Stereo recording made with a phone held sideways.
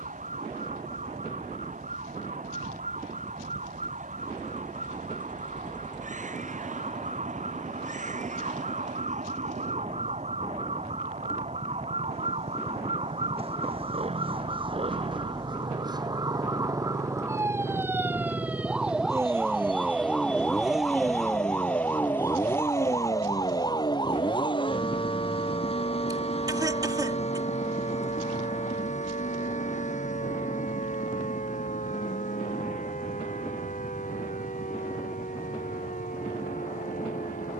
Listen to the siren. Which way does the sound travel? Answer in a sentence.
In this clip you hear the siren move to the left.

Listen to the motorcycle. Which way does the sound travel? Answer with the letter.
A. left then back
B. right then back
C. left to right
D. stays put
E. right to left
E.